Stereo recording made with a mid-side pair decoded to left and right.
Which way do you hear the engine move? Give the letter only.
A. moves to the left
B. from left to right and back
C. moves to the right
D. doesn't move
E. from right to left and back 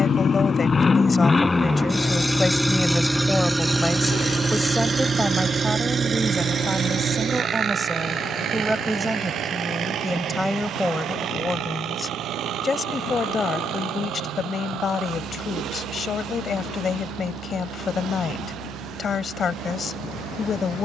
C.